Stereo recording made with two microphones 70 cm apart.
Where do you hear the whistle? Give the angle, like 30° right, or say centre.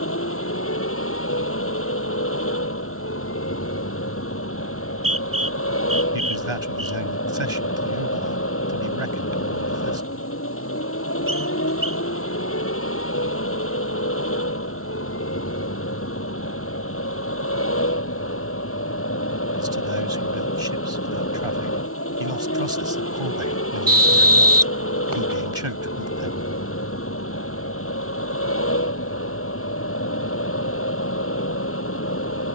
30° right.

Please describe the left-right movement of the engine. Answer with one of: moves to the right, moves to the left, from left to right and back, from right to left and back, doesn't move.
doesn't move.